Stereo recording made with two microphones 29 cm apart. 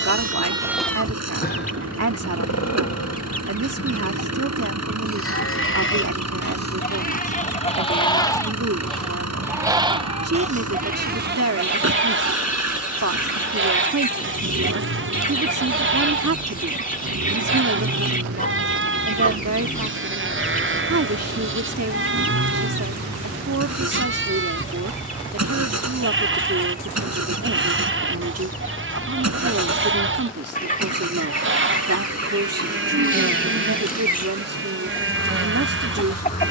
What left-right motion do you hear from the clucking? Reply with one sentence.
You can hear the clucking stay in one place.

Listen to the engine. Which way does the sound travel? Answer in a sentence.
In this clip you hear the engine stay in one place.